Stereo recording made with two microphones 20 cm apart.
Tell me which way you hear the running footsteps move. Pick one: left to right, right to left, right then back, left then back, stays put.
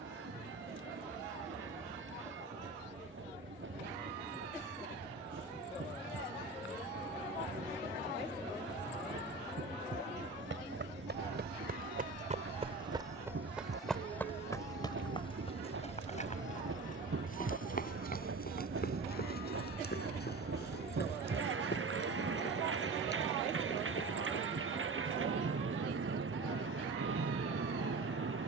right to left.